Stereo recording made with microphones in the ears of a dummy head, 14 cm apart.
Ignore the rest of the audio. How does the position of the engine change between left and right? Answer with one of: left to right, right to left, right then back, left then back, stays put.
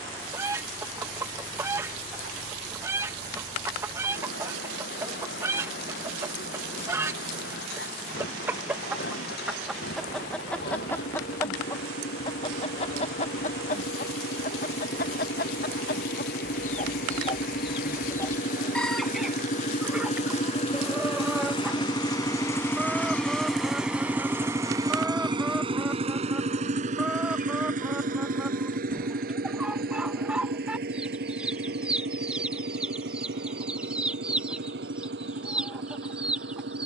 left to right.